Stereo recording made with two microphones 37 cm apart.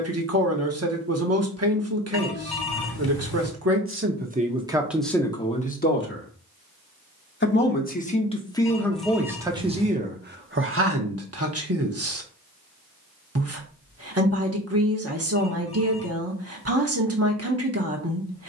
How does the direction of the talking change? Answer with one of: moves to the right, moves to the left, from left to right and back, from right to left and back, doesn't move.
from right to left and back.